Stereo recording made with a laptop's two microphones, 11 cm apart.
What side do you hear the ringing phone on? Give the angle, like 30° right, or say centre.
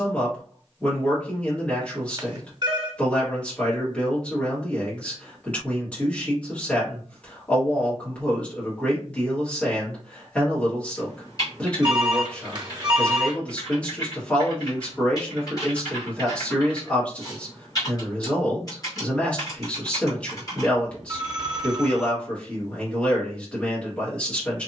40° right.